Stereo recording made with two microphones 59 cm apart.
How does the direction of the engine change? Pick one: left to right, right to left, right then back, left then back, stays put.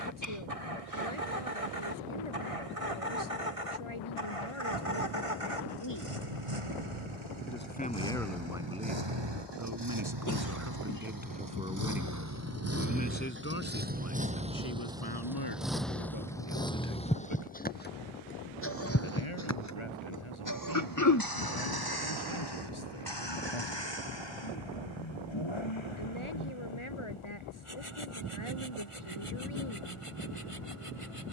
right to left.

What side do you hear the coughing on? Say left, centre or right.
left.